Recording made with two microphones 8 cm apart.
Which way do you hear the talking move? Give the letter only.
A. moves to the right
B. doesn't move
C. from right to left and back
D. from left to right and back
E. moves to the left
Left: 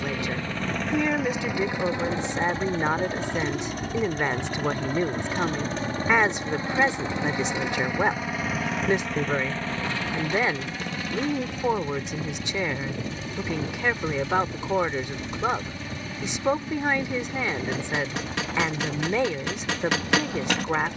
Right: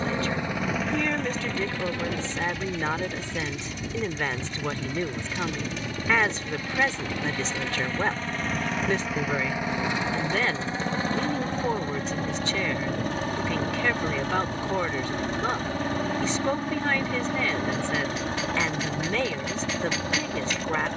B.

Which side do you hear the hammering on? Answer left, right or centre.
left.